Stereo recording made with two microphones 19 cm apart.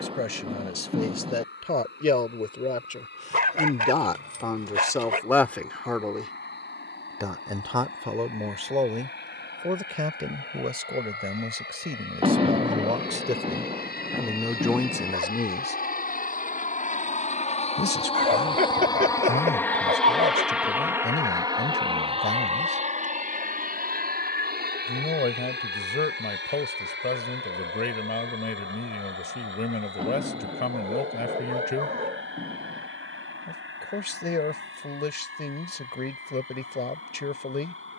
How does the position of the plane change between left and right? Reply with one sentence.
You can hear the plane go from the left side to the right.